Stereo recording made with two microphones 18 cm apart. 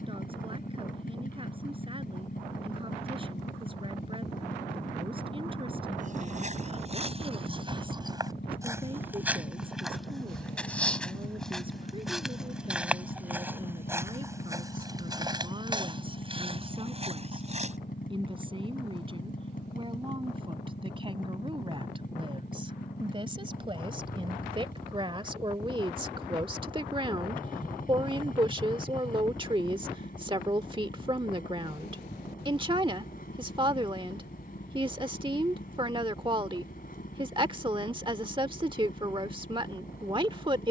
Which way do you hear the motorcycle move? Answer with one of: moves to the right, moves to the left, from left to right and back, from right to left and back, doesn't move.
doesn't move.